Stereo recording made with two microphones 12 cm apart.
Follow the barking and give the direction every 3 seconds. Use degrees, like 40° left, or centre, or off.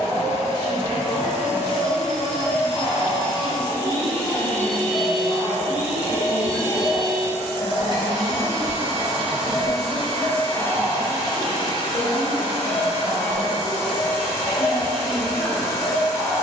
50° left, 50° left, 40° left, 10° left, 20° left, 40° left.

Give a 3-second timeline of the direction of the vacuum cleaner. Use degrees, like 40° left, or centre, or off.
60° left, 10° left, 30° right, 10° left, 60° left, 60° left.